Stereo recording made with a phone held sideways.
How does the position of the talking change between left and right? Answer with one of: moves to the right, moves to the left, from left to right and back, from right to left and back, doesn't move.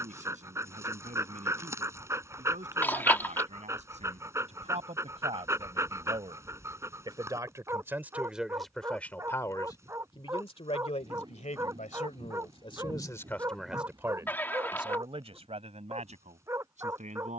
from right to left and back.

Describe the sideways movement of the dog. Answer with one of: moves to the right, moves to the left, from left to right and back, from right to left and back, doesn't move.
doesn't move.